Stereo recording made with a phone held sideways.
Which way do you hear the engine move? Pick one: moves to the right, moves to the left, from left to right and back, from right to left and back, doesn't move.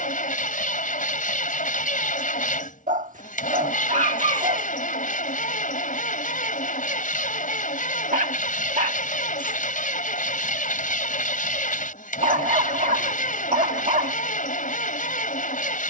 doesn't move.